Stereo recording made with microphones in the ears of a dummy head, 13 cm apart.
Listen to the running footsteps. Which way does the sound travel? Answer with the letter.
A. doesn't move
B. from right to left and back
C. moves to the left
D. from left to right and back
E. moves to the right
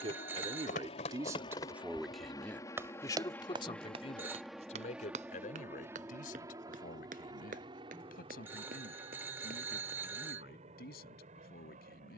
E.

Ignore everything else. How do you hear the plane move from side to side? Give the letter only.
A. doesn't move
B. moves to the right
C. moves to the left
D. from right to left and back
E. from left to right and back
B.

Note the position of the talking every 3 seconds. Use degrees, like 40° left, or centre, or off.
20° right, 50° left, 70° left, 80° left.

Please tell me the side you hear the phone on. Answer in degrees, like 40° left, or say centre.
10° right.